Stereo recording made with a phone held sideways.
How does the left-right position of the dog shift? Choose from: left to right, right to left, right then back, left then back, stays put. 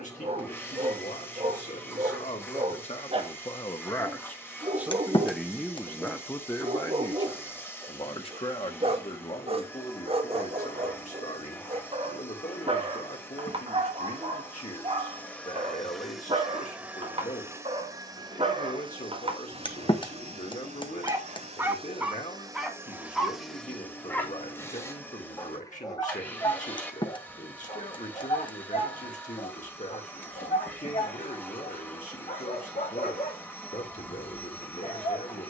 right to left.